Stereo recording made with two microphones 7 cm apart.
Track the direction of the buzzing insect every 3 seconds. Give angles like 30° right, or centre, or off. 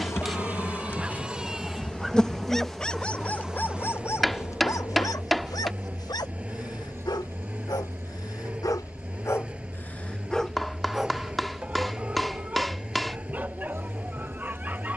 20° left, 20° right, 40° right, 50° right, 50° right.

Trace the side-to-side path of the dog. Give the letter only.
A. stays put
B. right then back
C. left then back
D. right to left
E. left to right
C.